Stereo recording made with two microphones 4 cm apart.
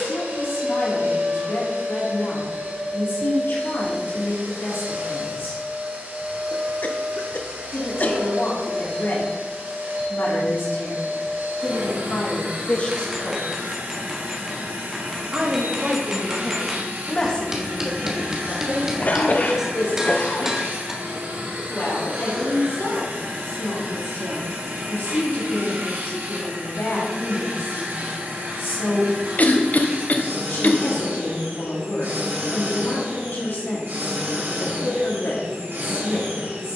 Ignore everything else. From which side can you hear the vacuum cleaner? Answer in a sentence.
In this clip you hear the vacuum cleaner on the right.